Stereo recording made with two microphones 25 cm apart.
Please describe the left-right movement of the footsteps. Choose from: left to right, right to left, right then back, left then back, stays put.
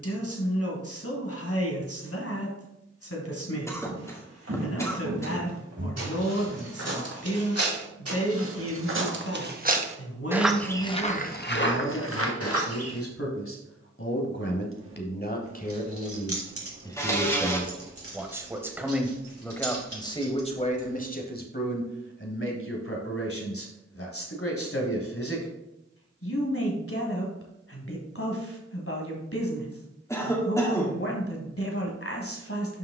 right to left.